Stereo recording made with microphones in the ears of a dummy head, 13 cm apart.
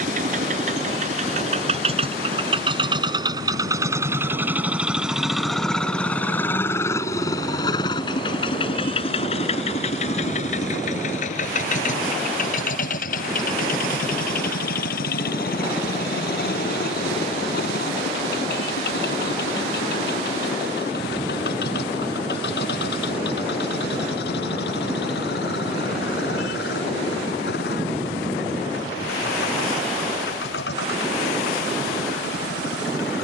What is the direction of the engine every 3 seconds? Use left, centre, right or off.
right, centre, left, left, left, left, left, left, left, left, left.